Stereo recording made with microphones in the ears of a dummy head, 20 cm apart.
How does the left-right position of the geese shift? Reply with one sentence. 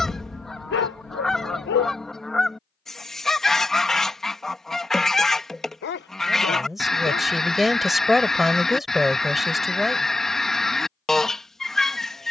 In this clip you hear the geese stay put.